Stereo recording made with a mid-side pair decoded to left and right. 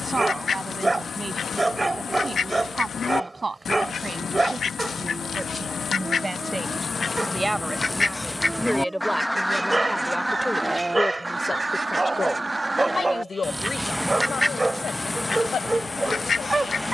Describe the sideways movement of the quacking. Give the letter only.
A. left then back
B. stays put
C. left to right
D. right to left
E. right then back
E.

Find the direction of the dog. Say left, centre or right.
right.